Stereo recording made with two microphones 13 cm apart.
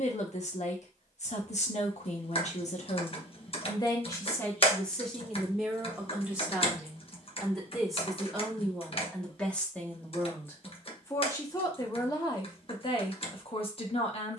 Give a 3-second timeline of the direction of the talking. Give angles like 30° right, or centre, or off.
60° left, 10° left, centre, 20° left, 40° left.